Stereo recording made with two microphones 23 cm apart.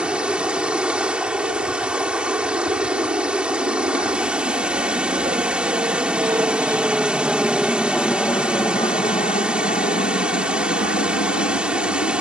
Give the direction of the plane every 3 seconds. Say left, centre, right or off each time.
right, right, centre, left.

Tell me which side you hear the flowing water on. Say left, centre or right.
centre.